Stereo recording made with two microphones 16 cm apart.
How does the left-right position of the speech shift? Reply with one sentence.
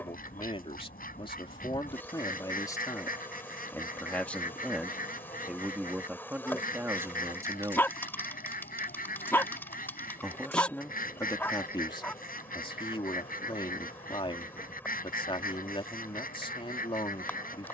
In this clip you hear the speech go right and come back.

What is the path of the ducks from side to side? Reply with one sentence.
You can hear the ducks stay in one place.